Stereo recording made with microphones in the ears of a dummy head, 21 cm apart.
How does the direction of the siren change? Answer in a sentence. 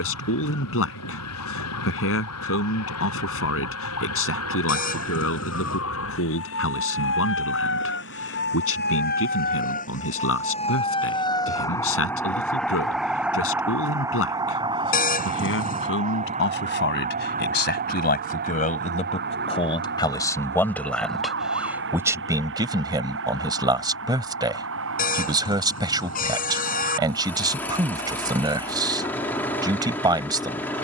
You can hear the siren go from the left side to the right.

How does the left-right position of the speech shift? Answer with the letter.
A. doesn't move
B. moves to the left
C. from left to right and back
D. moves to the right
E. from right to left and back
D.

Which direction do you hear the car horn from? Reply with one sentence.
You can hear the car horn on the left.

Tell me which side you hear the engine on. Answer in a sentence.
In this clip you hear the engine in the centre.